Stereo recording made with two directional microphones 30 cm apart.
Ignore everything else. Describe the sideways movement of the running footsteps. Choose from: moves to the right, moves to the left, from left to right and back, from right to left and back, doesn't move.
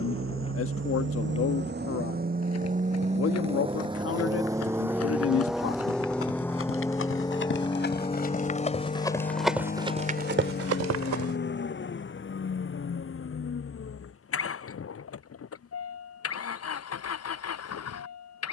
moves to the right.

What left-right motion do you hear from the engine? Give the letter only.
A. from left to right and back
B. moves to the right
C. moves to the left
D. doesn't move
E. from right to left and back
C.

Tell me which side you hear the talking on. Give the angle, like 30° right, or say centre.
50° left.